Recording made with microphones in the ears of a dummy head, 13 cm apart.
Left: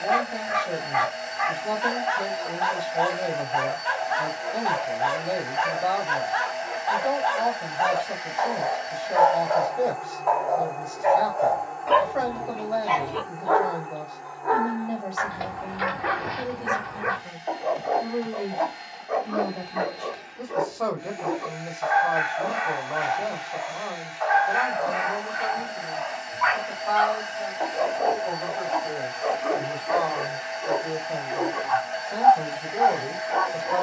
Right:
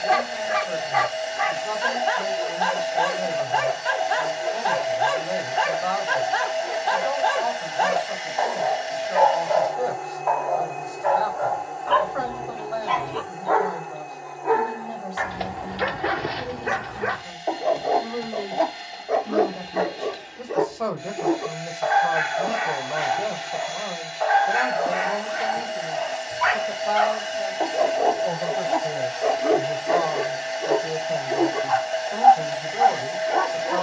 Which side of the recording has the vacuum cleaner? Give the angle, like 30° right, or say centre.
40° right.